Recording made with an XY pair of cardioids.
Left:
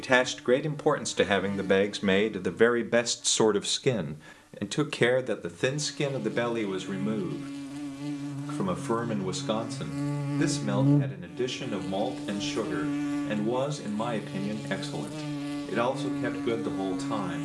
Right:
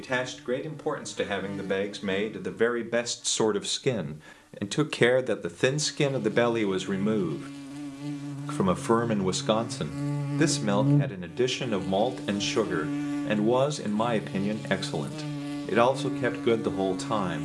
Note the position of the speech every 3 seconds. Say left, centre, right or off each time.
left, centre, right, right, right, right.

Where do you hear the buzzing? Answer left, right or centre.
centre.